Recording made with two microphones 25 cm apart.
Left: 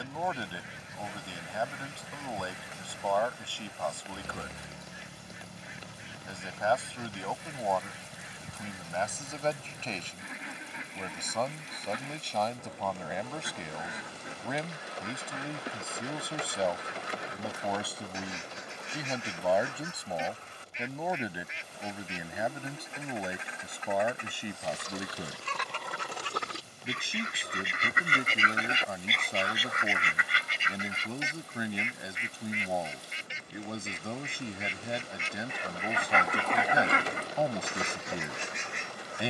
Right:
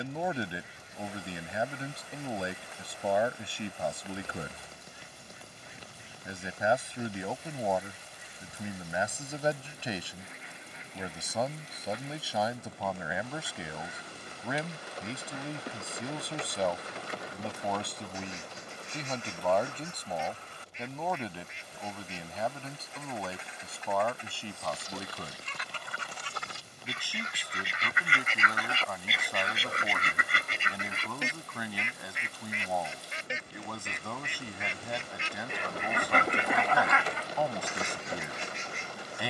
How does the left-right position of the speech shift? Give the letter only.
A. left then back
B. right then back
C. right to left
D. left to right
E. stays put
C.